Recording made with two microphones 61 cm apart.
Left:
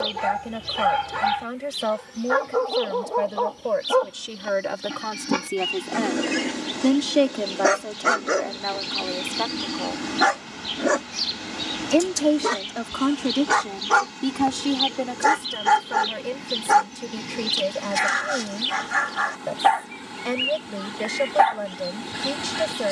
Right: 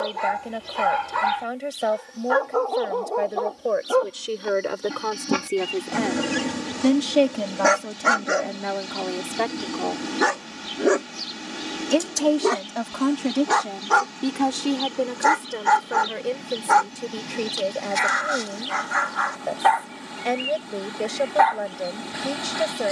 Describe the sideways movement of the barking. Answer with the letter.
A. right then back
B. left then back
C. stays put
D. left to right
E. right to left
A.